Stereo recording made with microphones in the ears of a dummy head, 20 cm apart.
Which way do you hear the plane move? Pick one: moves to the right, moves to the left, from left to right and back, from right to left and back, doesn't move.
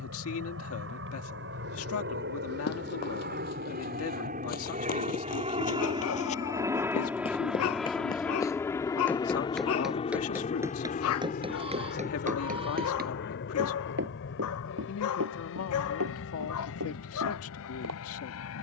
moves to the left.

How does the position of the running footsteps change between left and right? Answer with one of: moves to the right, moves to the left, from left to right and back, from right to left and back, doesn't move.
moves to the right.